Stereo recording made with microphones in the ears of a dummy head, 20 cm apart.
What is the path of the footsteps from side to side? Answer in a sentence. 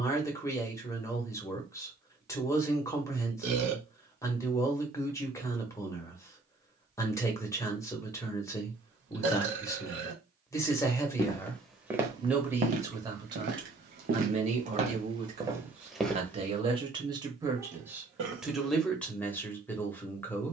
You can hear the footsteps move from left to right and back again.